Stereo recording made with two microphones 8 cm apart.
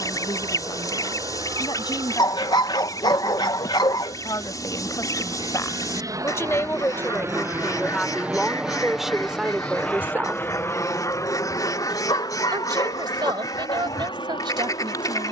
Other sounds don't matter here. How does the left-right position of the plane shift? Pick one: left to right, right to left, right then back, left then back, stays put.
right to left.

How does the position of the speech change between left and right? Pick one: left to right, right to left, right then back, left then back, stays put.
left to right.